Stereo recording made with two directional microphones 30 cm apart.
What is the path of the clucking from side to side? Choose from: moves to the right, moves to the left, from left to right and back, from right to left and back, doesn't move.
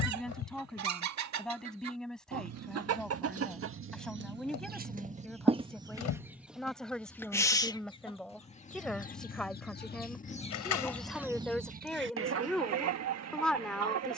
from right to left and back.